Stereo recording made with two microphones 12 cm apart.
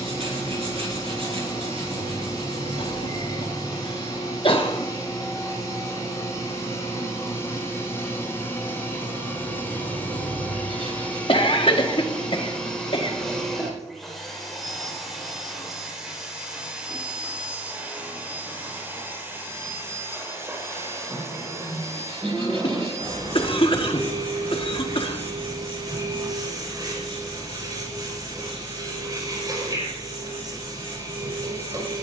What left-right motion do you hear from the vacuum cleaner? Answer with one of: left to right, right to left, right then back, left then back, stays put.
left to right.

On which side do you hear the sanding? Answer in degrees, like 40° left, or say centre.
50° right.